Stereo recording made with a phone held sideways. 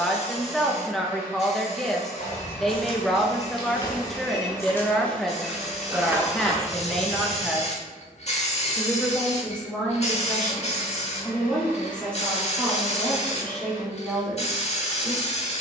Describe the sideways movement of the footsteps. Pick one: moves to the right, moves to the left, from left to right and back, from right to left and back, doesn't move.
moves to the right.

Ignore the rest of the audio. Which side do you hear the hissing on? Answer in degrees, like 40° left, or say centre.
50° left.